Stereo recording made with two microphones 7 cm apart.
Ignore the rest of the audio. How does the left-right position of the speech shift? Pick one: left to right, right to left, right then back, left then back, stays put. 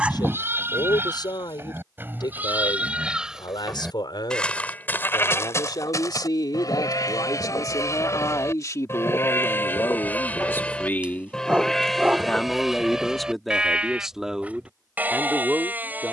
left to right.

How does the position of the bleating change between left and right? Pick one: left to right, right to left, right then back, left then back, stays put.
left then back.